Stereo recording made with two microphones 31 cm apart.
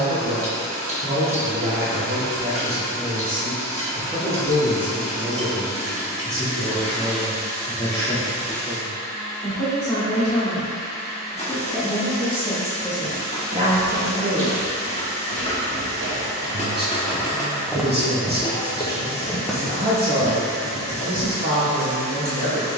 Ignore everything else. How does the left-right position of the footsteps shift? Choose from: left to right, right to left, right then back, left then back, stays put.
left then back.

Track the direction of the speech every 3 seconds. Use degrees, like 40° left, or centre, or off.
30° right, 10° right, 10° left, 10° left, 20° right, 30° right, 30° right, 30° right.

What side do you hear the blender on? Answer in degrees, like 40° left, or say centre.
50° right.